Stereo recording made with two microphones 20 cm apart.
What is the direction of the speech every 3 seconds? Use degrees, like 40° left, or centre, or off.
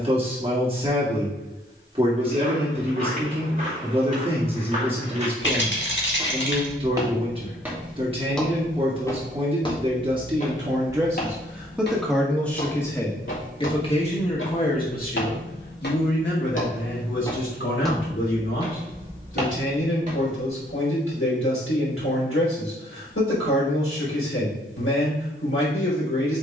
30° right, 30° right, 30° right, 20° right, 20° left, 60° left, 80° left, 80° left, 80° left.